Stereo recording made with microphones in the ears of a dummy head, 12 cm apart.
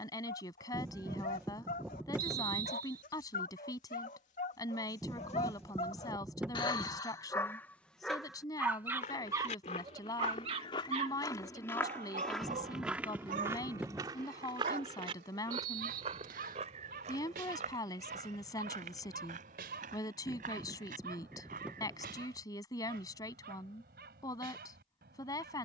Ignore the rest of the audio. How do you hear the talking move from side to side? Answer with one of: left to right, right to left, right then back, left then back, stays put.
stays put.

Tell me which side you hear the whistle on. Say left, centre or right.
right.